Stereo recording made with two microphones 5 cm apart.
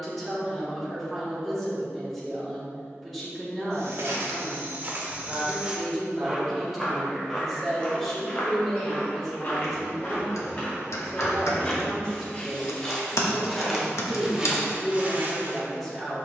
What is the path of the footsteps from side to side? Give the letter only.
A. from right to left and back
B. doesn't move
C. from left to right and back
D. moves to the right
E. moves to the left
A.